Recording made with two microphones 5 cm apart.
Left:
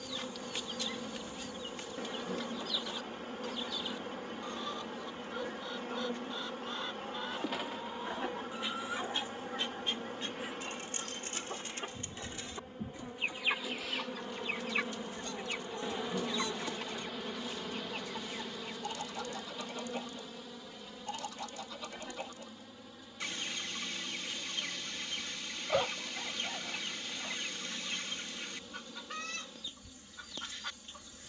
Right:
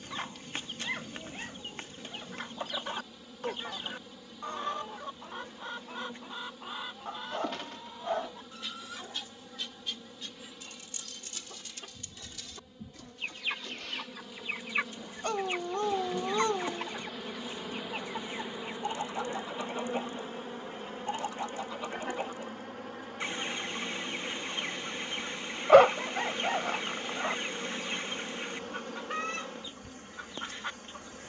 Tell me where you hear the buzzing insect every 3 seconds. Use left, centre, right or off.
left, left, left, left, left, centre, right, right, right, right, right.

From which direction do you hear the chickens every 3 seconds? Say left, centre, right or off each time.
right, right, centre, left, centre, right, right, right, right, right, right.